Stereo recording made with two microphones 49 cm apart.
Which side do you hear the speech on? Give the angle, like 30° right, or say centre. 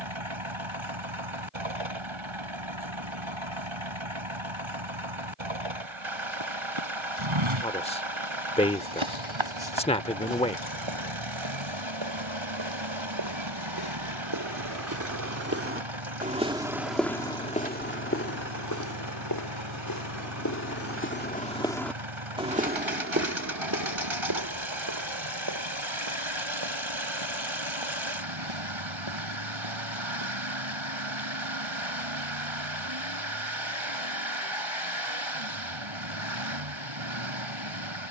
10° left.